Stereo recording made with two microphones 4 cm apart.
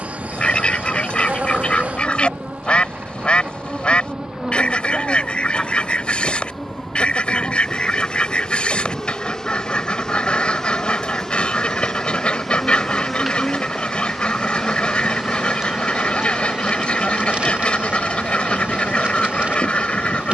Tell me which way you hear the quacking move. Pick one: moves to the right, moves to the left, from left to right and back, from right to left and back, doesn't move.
doesn't move.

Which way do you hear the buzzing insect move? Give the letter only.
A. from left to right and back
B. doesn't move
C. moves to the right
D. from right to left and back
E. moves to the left
D.